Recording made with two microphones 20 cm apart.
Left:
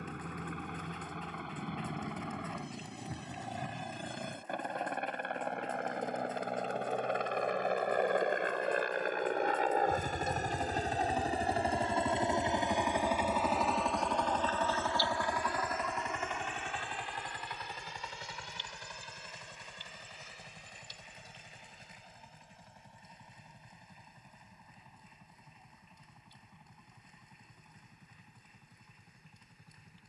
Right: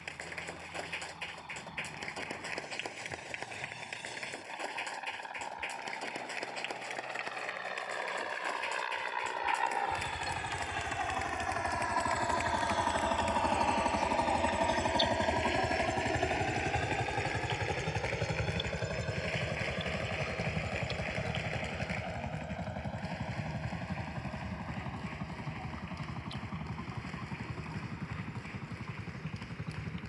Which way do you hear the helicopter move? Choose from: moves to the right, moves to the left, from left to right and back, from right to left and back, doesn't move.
moves to the right.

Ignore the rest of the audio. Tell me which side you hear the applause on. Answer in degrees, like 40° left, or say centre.
80° right.